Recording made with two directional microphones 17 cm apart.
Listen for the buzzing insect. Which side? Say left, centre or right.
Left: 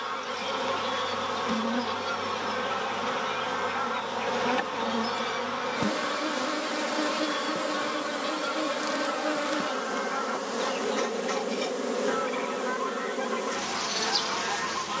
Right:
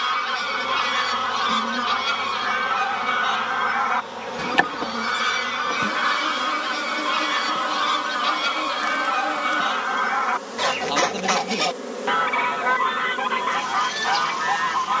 centre.